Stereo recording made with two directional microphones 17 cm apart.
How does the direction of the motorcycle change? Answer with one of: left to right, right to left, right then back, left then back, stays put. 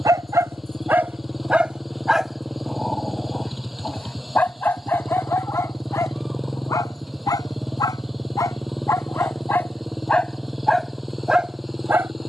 stays put.